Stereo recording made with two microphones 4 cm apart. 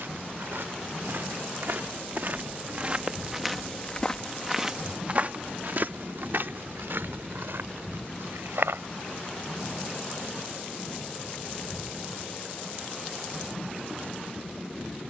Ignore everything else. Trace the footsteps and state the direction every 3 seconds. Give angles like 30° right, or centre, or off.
60° right, 20° right, 70° right, off, off.